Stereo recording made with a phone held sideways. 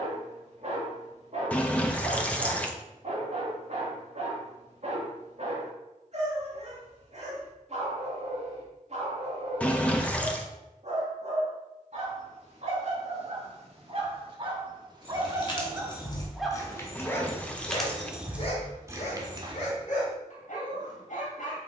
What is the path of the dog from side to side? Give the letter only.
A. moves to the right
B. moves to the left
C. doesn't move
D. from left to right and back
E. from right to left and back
B.